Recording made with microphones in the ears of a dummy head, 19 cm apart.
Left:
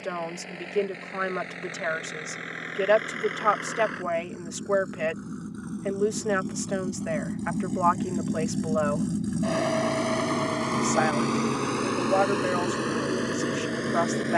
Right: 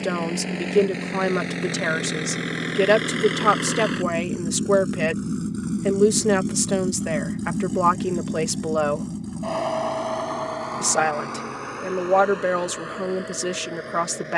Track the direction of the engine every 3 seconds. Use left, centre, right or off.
right, right, centre, left, left.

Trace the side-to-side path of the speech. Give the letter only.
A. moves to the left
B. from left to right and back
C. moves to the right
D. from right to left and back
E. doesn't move
E.